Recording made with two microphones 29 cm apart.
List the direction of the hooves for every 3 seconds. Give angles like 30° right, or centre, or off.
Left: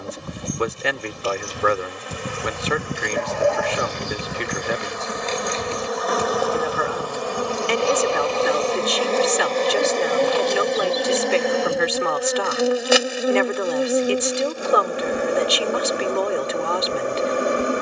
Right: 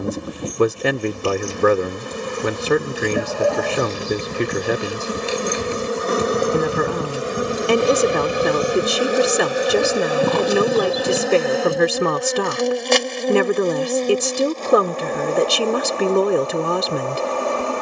40° left, centre, 40° right, 60° right, off, off.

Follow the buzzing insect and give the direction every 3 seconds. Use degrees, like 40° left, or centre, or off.
50° right, 40° right, 20° right, 10° right, 10° left, 20° left.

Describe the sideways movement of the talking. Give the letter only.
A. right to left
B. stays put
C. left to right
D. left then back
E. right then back
B.